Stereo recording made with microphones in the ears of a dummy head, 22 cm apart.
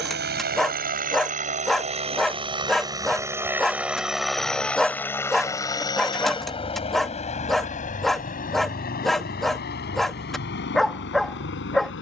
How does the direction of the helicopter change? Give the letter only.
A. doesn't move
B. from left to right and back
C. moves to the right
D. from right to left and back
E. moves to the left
E.